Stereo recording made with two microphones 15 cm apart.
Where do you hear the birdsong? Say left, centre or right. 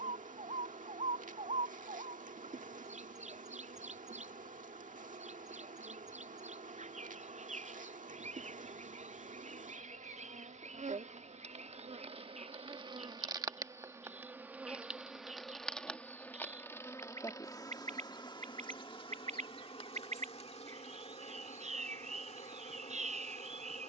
right.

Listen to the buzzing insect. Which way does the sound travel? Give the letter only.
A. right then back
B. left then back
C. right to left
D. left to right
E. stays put
C.